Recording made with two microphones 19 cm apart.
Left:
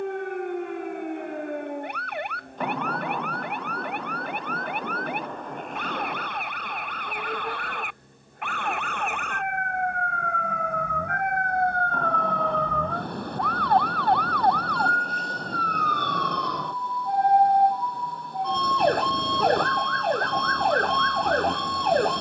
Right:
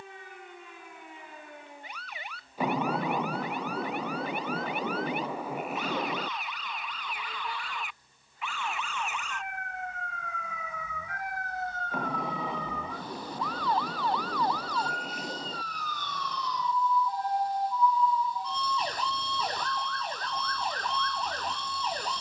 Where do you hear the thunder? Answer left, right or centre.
centre.